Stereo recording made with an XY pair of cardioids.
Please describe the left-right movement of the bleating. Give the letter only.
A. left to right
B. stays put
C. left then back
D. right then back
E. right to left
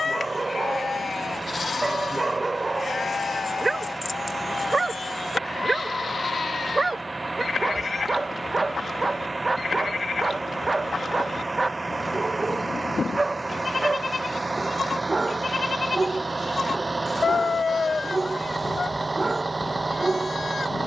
B.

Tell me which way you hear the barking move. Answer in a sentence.
In this clip you hear the barking stay put.